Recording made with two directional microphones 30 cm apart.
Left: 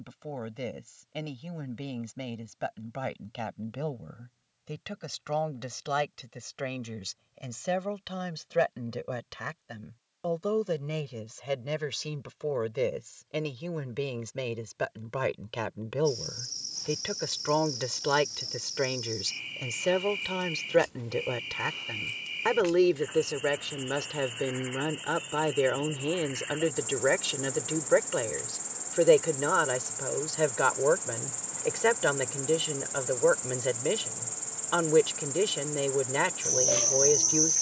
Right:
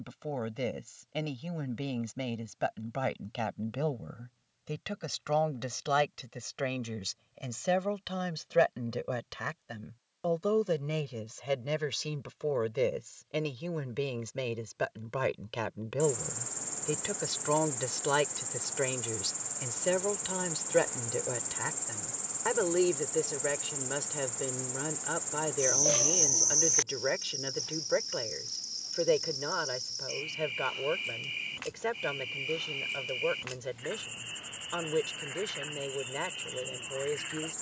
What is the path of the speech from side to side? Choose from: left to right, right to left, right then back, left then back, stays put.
right to left.